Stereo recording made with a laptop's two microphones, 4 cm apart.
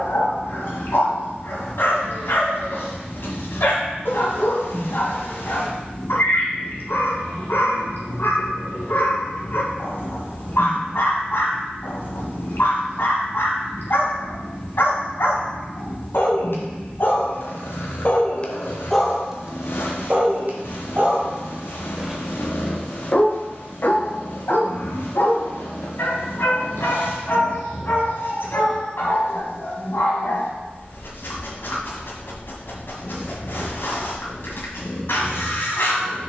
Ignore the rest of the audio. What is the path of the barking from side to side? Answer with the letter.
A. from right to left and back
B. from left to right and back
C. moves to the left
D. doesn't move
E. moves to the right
B.